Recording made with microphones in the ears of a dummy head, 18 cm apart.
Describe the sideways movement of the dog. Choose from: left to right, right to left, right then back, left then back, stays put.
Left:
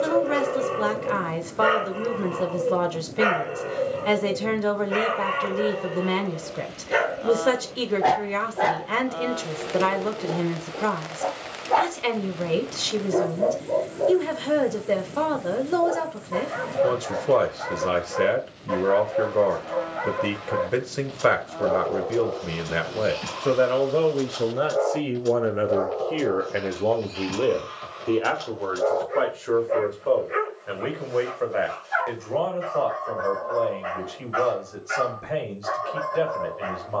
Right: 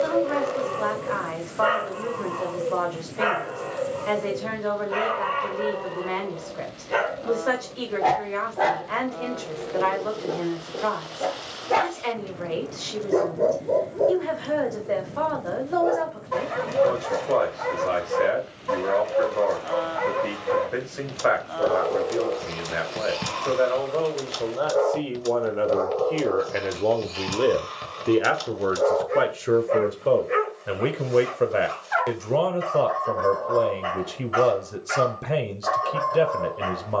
left to right.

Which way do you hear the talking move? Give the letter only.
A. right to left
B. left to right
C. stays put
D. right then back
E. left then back
B.